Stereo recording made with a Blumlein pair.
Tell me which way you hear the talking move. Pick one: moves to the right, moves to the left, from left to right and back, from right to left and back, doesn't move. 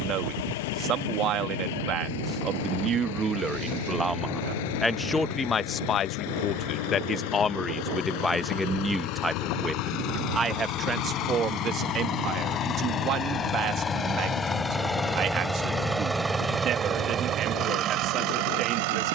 from right to left and back.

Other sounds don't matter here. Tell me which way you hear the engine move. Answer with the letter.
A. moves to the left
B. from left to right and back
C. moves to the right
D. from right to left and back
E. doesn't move
C.